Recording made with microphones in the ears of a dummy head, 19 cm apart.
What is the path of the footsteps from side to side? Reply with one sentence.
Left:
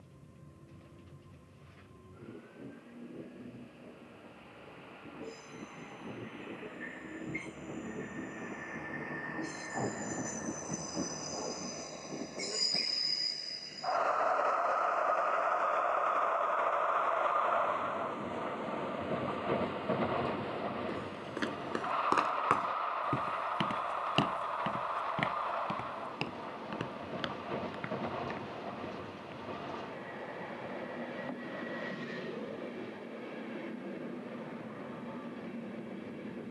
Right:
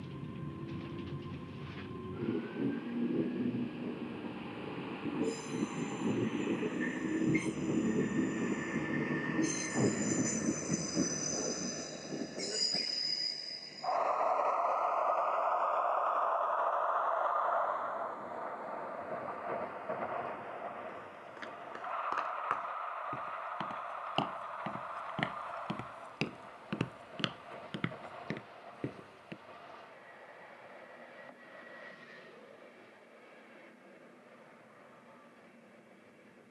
In this clip you hear the footsteps go from the left side to the right.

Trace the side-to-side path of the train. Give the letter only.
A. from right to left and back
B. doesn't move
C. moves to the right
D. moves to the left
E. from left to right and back
D.